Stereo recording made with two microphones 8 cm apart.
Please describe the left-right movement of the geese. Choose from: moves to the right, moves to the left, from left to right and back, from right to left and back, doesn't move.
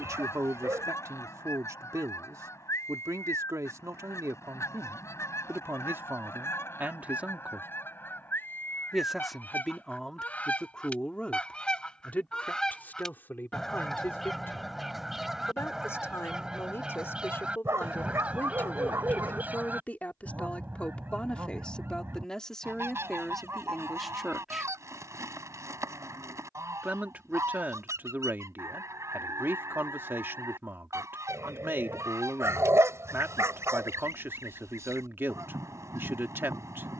moves to the right.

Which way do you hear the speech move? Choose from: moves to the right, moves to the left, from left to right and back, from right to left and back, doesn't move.
from right to left and back.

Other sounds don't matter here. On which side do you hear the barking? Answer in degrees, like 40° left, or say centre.
40° right.